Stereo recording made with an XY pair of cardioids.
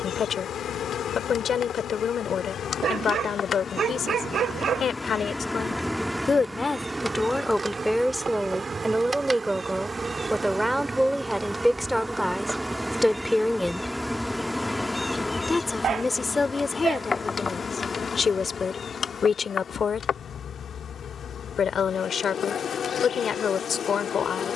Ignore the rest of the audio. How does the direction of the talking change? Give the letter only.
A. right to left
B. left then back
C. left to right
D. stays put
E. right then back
E.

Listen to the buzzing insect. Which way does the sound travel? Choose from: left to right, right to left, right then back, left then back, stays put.
right then back.